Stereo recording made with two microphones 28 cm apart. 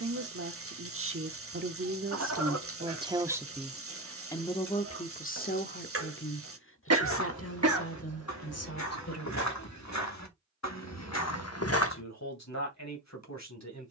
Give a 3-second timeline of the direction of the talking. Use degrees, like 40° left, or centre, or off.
40° right, 10° left, 50° left, 60° left, 70° left.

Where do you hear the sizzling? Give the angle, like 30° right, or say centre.
50° right.